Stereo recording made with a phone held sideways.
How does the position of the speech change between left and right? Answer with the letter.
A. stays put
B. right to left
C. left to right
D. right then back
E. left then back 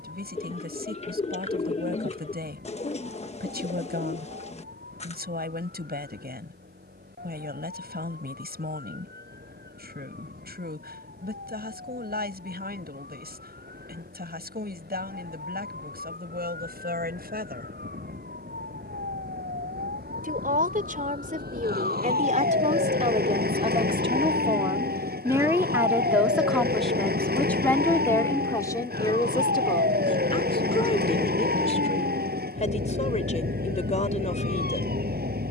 B.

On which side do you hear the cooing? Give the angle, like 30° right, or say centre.
40° left.